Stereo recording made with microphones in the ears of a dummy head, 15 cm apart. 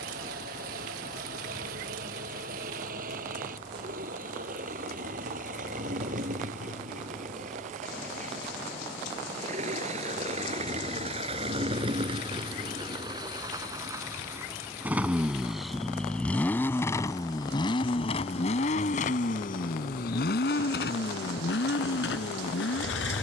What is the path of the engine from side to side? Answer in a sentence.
In this clip you hear the engine move from right to left.